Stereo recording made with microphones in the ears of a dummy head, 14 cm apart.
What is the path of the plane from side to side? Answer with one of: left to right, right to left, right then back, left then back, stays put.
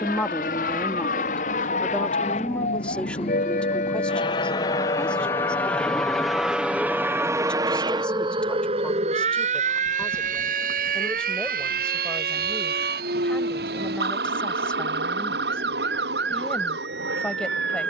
left to right.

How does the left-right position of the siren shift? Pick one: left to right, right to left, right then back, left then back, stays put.
left to right.